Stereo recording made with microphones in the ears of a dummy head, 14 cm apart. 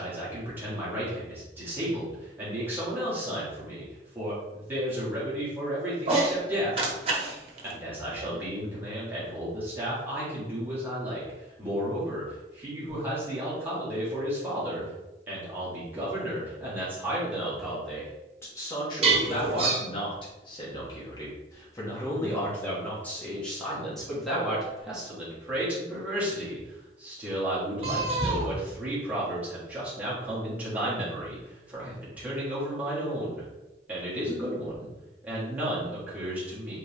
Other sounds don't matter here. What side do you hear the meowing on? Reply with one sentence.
You can hear the meowing on the right.